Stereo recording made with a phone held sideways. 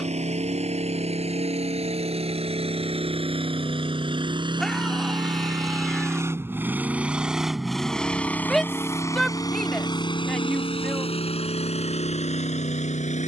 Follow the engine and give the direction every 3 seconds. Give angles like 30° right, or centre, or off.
50° right, 40° right, centre, 40° left, 60° left.